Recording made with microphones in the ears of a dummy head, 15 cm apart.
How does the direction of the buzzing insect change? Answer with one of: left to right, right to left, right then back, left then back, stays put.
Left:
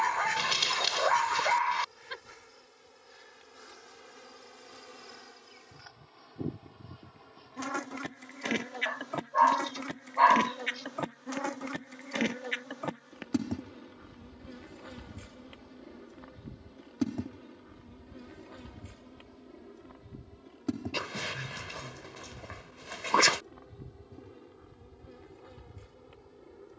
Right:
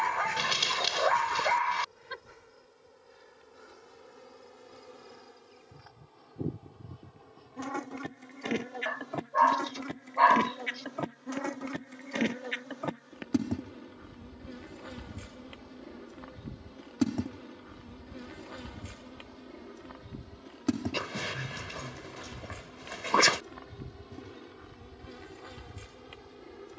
left to right.